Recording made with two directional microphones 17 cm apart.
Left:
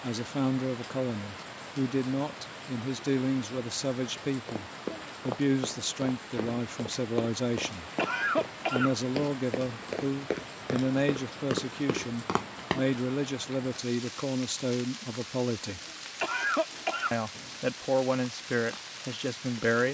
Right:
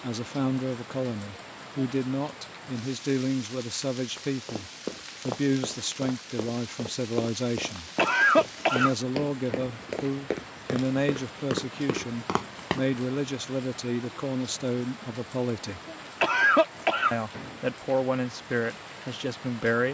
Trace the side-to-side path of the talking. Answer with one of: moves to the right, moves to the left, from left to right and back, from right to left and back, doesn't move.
doesn't move.